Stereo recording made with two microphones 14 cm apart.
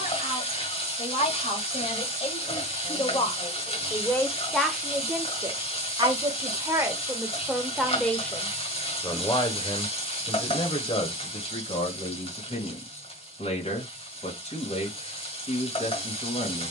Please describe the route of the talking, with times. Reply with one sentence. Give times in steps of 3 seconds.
In this clip you hear the talking on the left from 0 s, in the centre from 3 s and on the left from 9 s.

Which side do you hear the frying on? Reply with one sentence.
You can hear the frying on the left.